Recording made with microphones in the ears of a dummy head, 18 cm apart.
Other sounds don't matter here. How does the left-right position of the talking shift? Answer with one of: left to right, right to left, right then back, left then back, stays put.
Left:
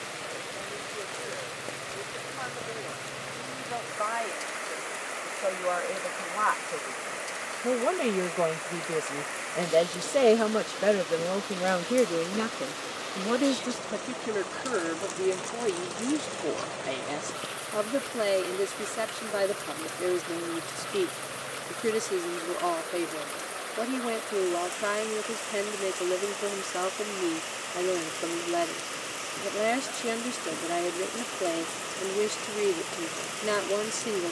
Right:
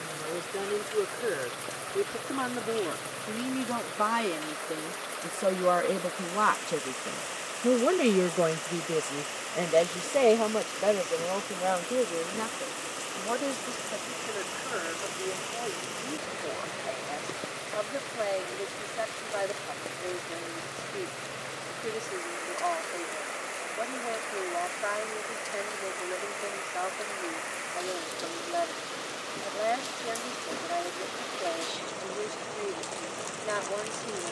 right to left.